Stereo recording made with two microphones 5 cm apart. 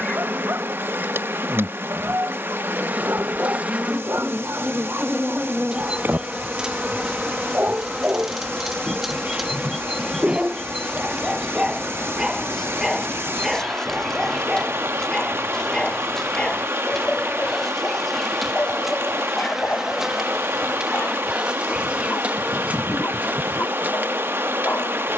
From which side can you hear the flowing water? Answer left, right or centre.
right.